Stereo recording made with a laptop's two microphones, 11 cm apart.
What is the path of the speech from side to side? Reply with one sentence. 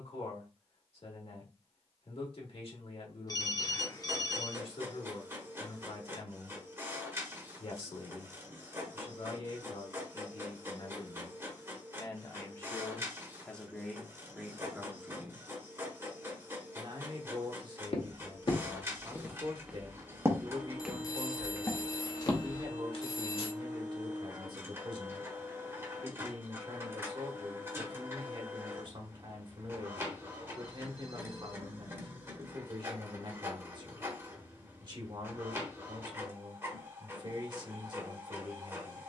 You can hear the speech travel towards the right.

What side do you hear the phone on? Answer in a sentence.
In this clip you hear the phone on the left.